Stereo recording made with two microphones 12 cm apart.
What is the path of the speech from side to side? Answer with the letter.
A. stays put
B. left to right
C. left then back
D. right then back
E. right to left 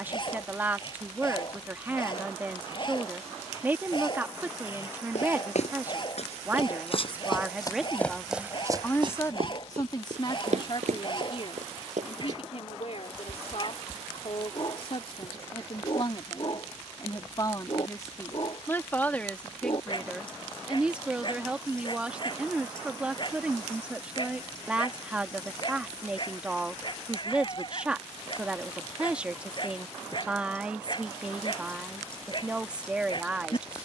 C.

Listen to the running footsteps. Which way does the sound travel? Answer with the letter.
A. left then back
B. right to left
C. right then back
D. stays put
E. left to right
E.